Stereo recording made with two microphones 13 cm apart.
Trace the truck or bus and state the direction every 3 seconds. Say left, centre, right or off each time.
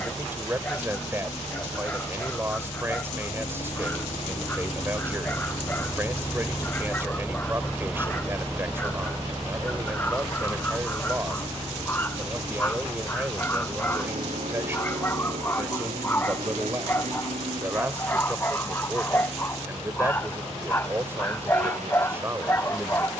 left, left, centre, right, right, right, right, right.